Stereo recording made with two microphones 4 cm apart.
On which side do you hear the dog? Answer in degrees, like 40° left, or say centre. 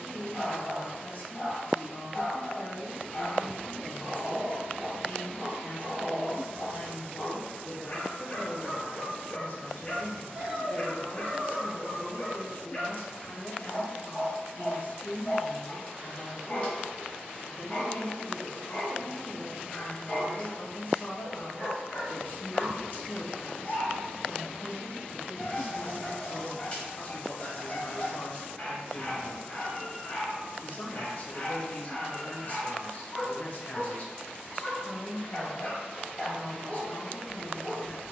30° left.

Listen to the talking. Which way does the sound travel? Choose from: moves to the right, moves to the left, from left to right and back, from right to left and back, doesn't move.
doesn't move.